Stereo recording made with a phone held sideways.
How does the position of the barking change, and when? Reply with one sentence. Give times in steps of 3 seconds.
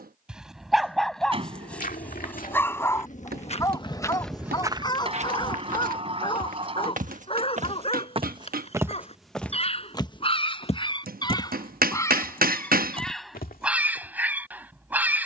In this clip you hear the barking in the centre from 0 s, on the left from 3 s and in the centre from 12 s.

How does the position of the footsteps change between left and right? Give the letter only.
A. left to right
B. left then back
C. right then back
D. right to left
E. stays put
C.